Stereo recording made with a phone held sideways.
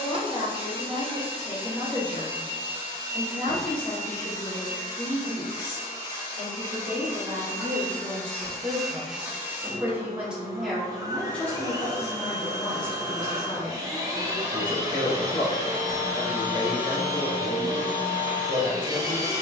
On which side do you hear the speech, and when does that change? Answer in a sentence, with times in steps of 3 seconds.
In this clip you hear the speech on the left from 0 s, in the centre from 3 s, on the right from 6 s, in the centre from 9 s and on the left from 12 s.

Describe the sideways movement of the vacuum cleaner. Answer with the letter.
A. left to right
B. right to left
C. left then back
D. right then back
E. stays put
C.